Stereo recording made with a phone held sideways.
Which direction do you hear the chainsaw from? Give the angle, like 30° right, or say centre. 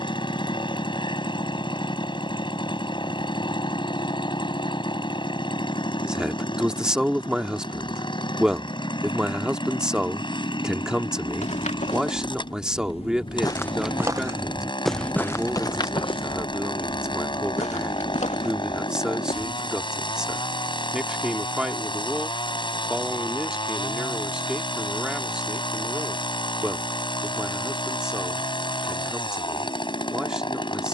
40° left.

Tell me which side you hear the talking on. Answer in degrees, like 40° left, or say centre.
10° right.